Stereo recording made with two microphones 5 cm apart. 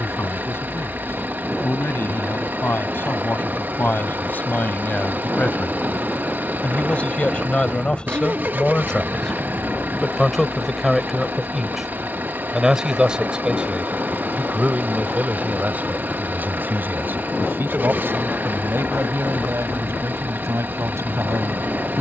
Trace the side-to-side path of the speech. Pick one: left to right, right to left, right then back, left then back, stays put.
left to right.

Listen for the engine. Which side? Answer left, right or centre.
right.